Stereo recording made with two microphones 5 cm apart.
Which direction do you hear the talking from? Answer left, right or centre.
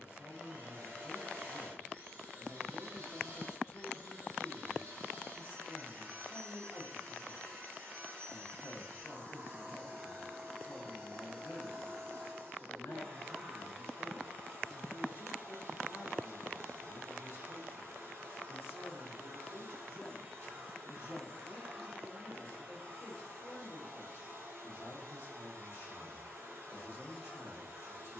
left.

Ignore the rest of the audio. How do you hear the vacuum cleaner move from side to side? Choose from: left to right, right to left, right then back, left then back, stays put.
stays put.